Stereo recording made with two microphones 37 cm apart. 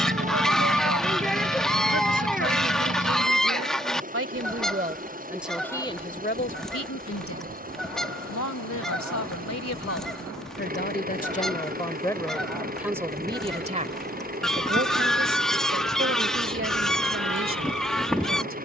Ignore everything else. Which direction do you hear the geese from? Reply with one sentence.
In this clip you hear the geese in the centre.